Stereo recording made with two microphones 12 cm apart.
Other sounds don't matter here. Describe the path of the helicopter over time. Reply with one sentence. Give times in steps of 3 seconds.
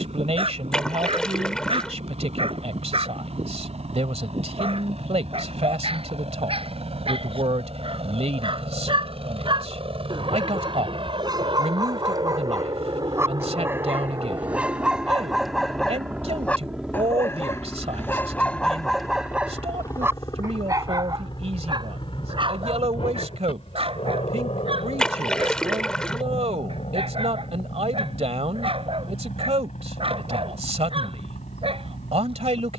You can hear the helicopter on the right from 0 s, in the centre from 15 s and on the left from 18 s.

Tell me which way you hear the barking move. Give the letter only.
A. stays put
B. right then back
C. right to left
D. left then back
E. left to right
D.